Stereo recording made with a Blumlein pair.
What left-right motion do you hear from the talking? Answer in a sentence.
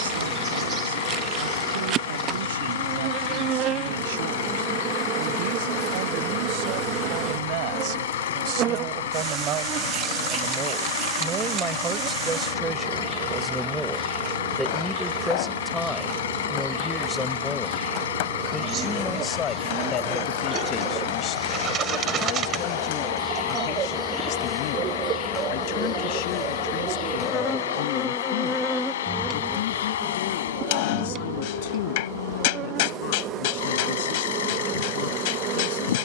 In this clip you hear the talking travel towards the left.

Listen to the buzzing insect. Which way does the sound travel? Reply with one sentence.
You can hear the buzzing insect go left and come back.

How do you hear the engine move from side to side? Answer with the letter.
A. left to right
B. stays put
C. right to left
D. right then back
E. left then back
B.